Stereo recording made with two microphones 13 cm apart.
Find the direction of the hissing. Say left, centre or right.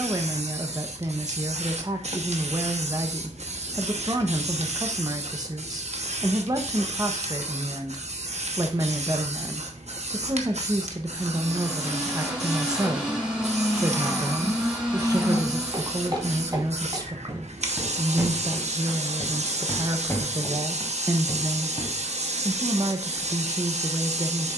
right.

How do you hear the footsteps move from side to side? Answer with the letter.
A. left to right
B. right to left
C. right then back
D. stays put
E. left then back
B.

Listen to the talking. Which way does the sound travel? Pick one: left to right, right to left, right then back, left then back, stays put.
stays put.